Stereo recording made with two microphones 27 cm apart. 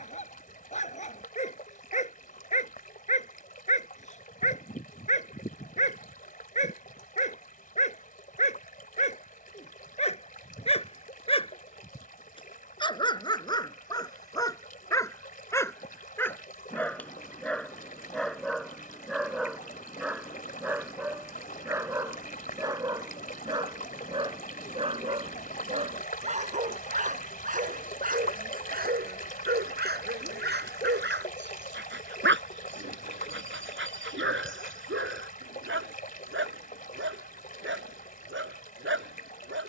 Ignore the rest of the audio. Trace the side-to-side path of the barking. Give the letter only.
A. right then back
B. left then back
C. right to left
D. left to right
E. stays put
D.